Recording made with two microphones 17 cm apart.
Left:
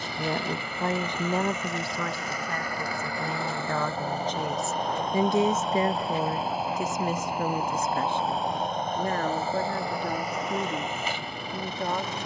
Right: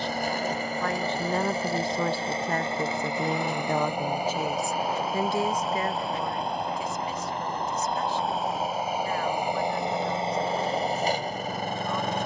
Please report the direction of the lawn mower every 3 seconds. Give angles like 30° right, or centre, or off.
40° right, 10° right, centre, 30° right.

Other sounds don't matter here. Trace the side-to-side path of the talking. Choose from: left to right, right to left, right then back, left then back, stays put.
right then back.